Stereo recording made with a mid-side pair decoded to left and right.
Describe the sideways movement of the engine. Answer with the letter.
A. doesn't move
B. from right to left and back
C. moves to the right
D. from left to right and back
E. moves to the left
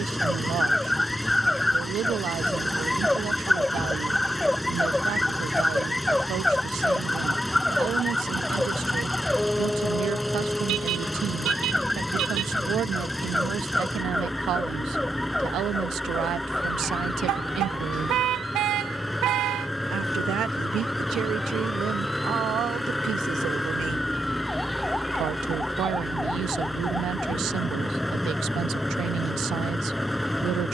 A.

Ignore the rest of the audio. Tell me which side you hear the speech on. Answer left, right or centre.
right.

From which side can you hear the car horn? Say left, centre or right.
right.